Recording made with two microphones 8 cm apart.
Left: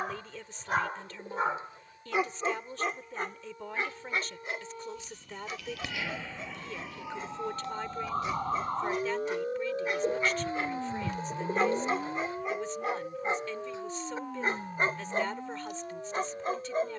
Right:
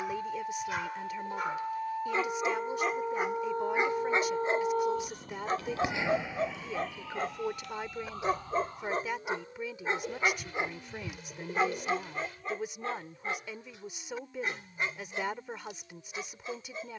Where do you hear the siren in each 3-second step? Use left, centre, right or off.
right, right, left, left, left, left.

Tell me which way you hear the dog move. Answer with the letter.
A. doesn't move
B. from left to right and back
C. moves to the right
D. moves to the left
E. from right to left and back
B.